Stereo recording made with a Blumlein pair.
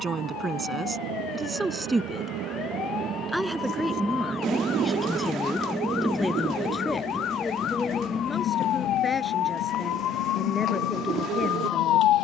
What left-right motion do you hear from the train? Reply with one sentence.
In this clip you hear the train travel towards the left.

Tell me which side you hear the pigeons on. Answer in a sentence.
In this clip you hear the pigeons on the right.